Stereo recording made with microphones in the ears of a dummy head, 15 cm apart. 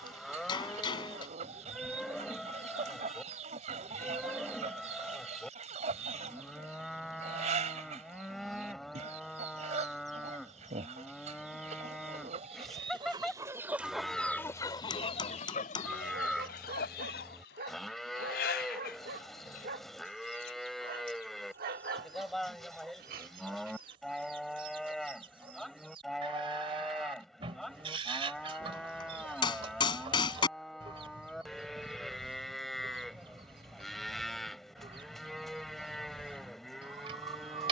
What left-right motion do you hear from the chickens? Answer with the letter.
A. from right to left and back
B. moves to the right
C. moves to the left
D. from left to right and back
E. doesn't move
A.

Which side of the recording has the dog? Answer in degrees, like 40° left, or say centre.
60° right.